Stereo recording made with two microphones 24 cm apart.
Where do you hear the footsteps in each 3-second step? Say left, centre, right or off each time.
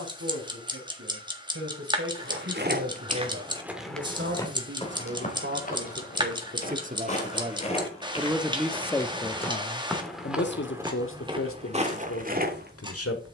right, centre, left, centre, right.